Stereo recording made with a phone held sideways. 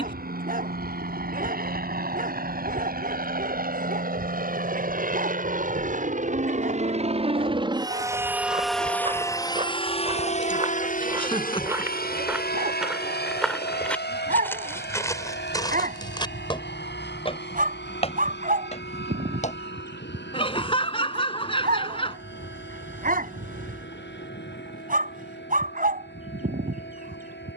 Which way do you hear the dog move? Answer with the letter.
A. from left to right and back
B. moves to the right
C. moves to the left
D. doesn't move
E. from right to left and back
D.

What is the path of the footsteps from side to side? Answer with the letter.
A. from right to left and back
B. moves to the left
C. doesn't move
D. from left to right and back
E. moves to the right
B.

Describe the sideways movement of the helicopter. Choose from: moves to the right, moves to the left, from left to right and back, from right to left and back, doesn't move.
moves to the left.